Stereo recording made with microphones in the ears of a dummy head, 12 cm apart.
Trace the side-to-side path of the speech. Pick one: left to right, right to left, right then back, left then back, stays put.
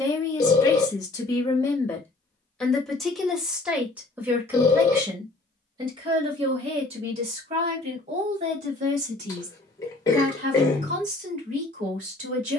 left to right.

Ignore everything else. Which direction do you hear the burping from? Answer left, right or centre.
left.